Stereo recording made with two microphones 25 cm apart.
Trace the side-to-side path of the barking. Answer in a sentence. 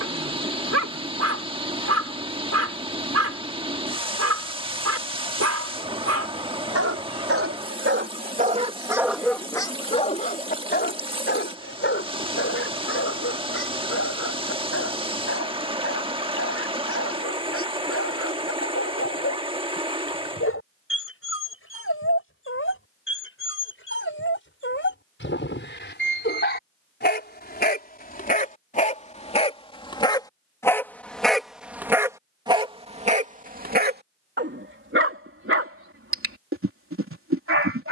You can hear the barking move from right to left and back again.